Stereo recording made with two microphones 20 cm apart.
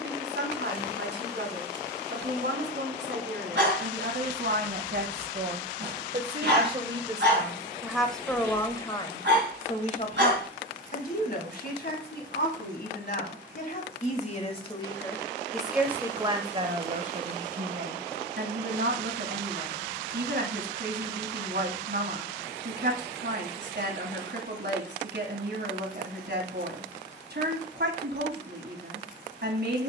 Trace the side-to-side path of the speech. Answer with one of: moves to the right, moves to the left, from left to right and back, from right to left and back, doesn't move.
from right to left and back.